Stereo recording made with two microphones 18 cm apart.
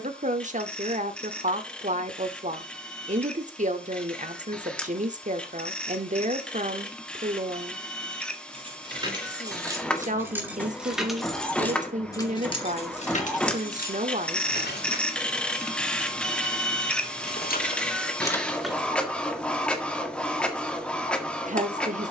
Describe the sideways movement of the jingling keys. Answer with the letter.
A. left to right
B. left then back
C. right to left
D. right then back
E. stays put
B.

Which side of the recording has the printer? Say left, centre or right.
centre.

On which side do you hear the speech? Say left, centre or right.
right.